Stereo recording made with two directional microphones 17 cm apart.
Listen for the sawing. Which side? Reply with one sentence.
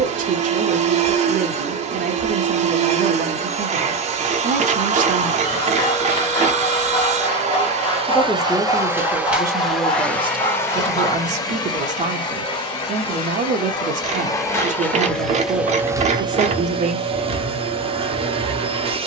In this clip you hear the sawing on the left.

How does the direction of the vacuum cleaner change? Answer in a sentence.
In this clip you hear the vacuum cleaner move from right to left and back again.